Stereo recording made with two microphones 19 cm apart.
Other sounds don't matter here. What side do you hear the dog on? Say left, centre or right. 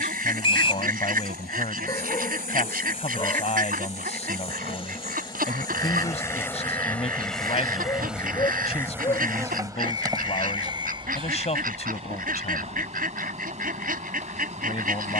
left.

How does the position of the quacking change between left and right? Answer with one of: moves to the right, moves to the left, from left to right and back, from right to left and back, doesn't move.
doesn't move.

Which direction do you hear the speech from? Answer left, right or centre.
left.